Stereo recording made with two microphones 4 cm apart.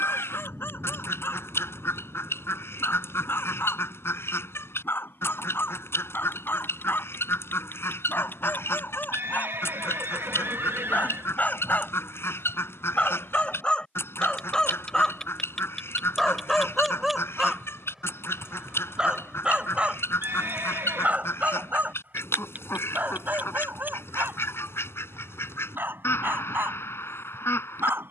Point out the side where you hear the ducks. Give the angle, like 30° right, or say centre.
80° left.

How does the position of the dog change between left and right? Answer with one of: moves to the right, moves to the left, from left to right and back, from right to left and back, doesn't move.
moves to the right.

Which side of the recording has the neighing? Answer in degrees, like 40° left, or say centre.
70° right.